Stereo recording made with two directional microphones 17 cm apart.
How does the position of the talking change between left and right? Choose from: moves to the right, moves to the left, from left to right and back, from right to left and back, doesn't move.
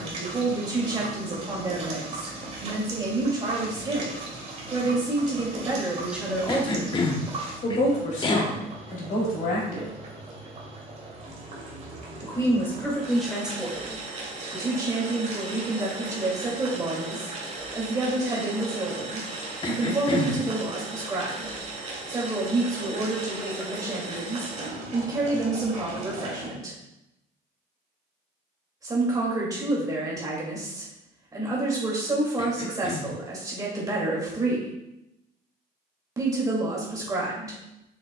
from right to left and back.